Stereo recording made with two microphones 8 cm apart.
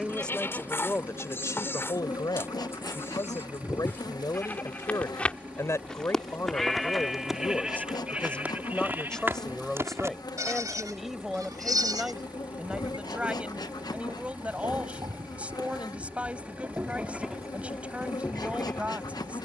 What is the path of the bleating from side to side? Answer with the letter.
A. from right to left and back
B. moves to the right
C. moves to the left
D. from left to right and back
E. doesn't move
D.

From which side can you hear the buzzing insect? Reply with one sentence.
In this clip you hear the buzzing insect on the left.